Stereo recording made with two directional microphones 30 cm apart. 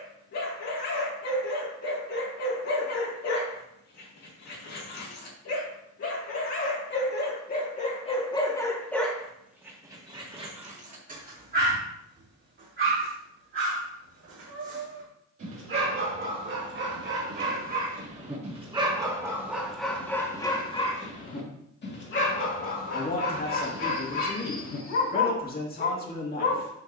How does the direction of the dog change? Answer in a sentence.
In this clip you hear the dog move from left to right and back again.